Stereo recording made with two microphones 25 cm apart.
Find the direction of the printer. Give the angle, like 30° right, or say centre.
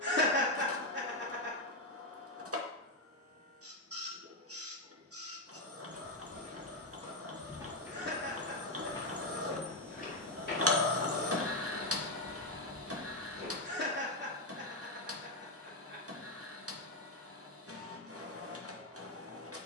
60° right.